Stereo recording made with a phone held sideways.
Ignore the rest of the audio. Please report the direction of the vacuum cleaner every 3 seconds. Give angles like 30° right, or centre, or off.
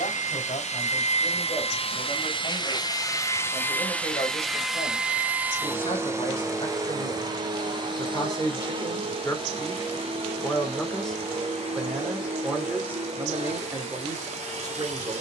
50° left, centre, 30° right, 50° right, 50° right.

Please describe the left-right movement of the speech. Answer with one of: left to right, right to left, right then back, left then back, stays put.
left to right.